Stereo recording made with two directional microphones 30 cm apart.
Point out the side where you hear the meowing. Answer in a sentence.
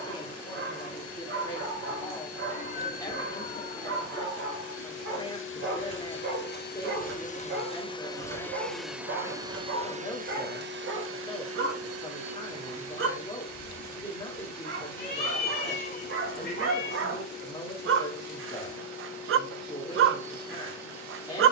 You can hear the meowing on the left.